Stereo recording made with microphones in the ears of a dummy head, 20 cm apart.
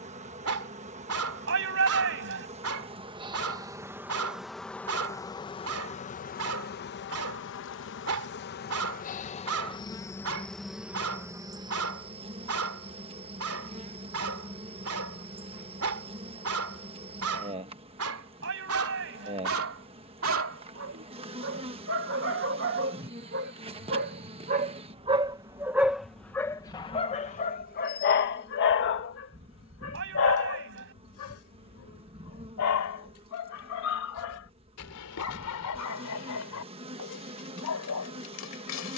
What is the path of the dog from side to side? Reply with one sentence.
You can hear the dog go from the right side to the left.